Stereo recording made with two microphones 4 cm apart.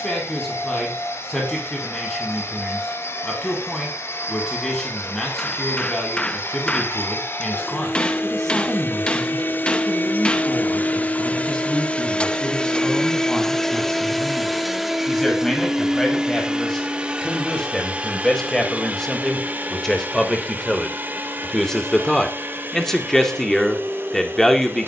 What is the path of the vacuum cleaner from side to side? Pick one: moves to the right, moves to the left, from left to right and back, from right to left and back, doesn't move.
moves to the right.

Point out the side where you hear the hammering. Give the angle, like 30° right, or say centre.
20° left.